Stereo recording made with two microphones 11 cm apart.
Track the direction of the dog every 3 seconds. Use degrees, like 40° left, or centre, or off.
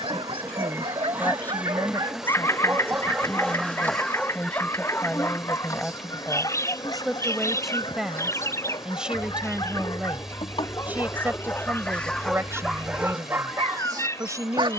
50° right, 10° left, 40° left, 30° left, 20° right.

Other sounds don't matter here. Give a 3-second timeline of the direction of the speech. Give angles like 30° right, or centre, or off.
20° left, 10° left, centre, 10° right, 30° right.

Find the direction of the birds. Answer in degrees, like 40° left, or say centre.
30° left.